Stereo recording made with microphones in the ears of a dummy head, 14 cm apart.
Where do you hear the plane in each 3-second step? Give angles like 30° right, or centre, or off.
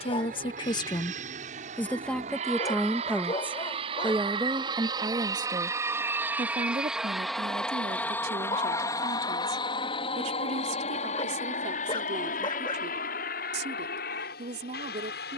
50° right, 30° right, centre, 30° left, 50° left.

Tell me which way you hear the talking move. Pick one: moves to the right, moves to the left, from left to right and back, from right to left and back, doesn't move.
moves to the right.